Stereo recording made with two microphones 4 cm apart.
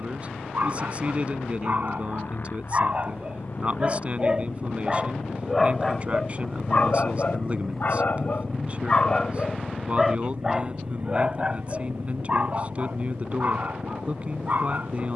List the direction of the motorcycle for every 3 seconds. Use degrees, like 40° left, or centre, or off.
50° left, 40° left, centre, 40° right, 70° right.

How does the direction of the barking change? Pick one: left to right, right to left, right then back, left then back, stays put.
left then back.